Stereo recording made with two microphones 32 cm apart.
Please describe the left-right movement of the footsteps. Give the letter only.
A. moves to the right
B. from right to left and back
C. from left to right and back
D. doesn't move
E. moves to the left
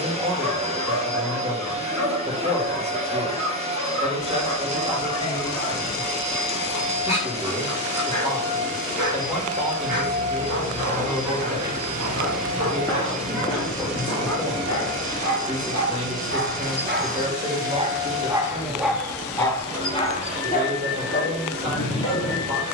E.